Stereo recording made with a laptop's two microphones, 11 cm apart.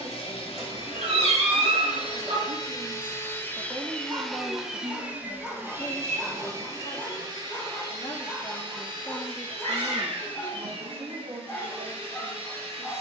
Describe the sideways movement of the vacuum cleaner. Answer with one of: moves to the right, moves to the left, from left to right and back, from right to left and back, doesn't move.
moves to the right.